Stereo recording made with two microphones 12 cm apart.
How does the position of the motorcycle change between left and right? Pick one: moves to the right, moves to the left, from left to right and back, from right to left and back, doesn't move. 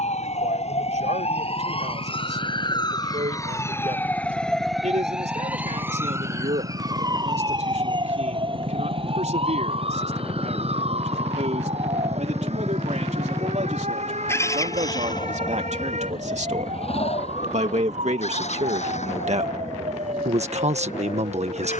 moves to the left.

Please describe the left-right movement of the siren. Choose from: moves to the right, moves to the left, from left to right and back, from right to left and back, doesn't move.
moves to the right.